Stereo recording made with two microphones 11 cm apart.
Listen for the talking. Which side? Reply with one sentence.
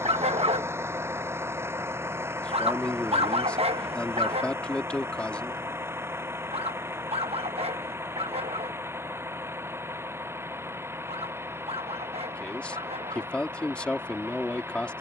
In this clip you hear the talking in the centre.